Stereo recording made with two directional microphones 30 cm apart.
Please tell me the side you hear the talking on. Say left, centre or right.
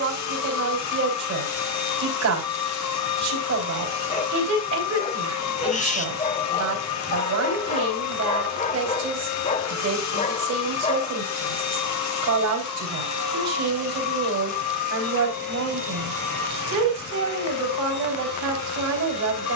right.